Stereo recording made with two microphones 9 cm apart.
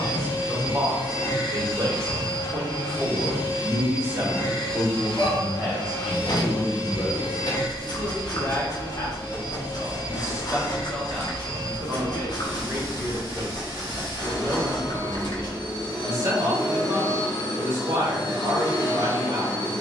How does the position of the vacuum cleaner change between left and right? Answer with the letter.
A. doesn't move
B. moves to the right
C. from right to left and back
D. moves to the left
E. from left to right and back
A.